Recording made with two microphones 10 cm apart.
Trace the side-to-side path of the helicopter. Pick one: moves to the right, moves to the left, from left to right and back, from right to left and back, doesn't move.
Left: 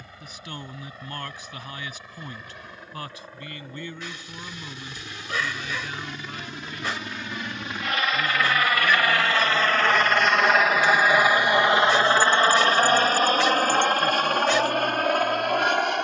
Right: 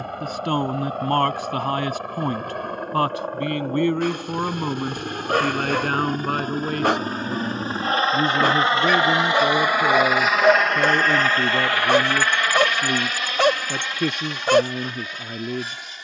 moves to the left.